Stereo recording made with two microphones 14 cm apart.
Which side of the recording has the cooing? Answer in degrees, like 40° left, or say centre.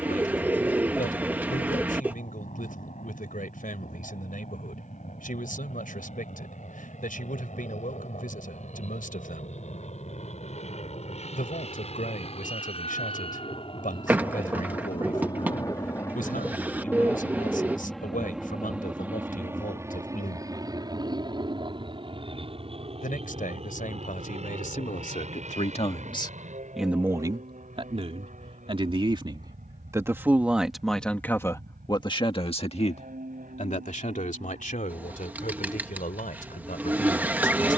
10° right.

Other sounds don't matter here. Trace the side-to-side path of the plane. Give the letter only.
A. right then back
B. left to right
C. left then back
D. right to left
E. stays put
B.